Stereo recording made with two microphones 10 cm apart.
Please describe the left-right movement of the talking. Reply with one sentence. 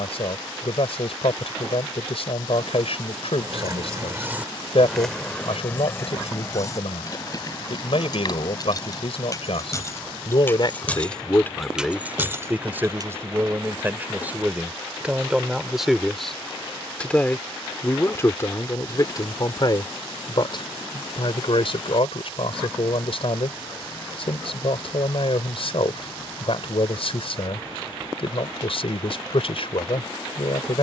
In this clip you hear the talking move from left to right and back again.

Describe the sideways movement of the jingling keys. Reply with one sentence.
In this clip you hear the jingling keys move from right to left and back again.